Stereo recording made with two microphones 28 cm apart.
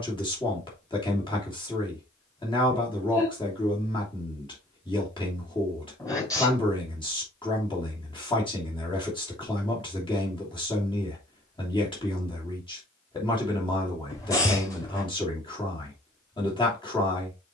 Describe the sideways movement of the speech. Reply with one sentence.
In this clip you hear the speech stay in one place.